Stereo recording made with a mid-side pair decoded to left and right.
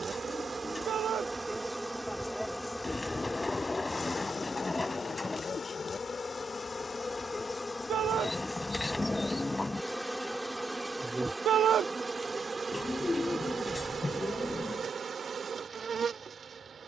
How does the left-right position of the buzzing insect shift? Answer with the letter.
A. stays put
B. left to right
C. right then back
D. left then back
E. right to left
D.